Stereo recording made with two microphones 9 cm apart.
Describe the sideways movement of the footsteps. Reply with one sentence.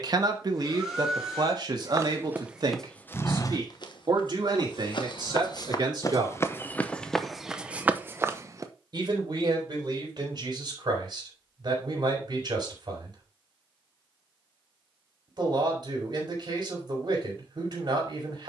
You can hear the footsteps go left and come back.